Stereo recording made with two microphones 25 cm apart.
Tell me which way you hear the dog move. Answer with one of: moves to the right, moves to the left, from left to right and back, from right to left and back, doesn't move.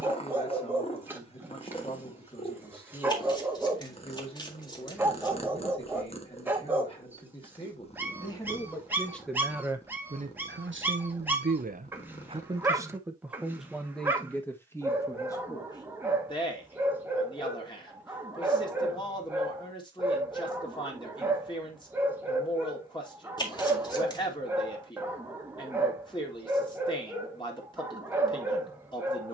doesn't move.